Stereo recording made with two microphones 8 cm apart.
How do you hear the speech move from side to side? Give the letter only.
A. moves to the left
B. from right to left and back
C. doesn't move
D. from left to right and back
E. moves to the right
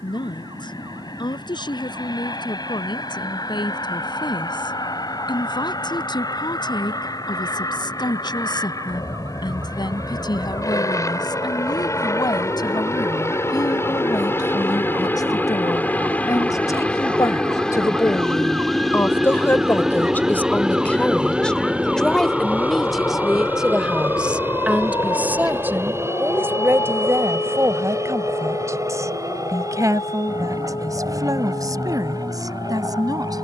E.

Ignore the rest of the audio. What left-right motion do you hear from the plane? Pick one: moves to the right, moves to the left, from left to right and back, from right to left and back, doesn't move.
moves to the right.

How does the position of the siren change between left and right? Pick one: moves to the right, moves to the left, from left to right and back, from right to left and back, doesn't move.
moves to the left.